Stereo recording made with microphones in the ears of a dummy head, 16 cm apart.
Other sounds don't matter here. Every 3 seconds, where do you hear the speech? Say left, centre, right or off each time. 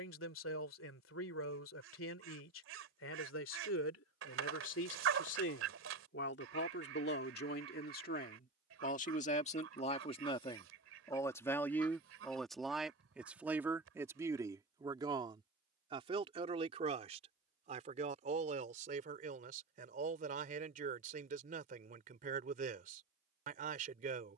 left, left, left, left, centre, right, right, right.